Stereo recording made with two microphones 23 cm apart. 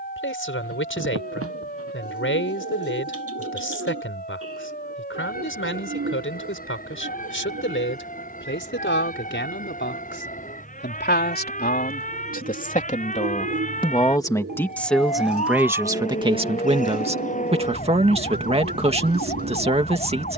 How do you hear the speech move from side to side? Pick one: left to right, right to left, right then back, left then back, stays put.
left to right.